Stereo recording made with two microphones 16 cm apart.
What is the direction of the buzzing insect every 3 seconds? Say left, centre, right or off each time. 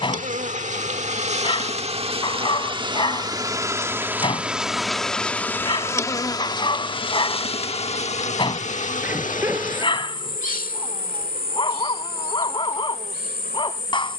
right, centre, left, left, left.